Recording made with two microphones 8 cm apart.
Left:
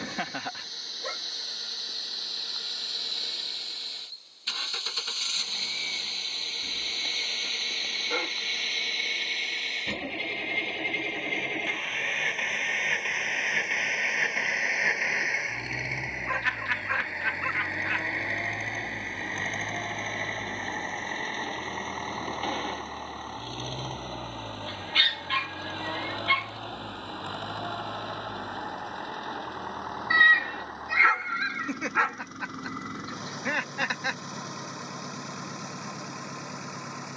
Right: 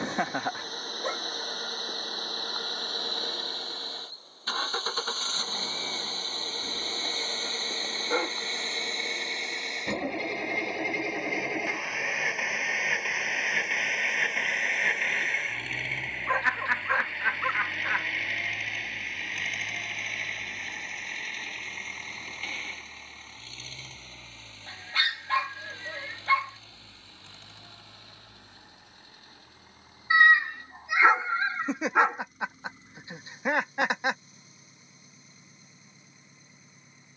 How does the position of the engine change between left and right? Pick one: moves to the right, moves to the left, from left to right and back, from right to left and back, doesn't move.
moves to the left.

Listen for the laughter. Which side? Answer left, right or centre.
right.